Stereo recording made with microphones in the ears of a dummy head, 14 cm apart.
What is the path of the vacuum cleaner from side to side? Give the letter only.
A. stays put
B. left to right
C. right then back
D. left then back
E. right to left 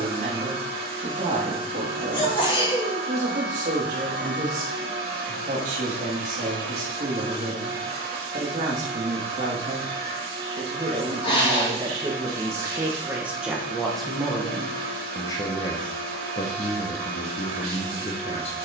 A.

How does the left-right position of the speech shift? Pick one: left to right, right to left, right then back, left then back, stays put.
right to left.